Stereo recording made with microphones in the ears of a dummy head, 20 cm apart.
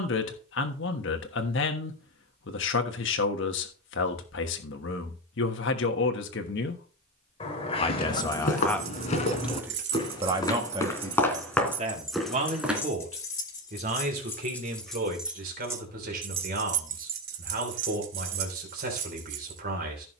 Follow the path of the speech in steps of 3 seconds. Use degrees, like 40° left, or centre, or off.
60° left, 60° left, 30° left, 20° right, 40° right, 50° right, 50° right.